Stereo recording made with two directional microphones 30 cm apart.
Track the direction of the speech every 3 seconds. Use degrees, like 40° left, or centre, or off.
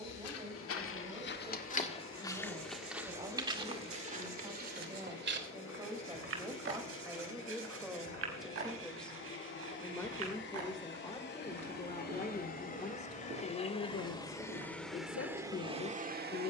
20° right, 20° right, 10° right, 10° left, 30° left, 40° left.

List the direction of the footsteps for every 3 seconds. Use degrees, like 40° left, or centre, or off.
30° left, 30° right, 50° right, 60° right, 60° right, 60° right.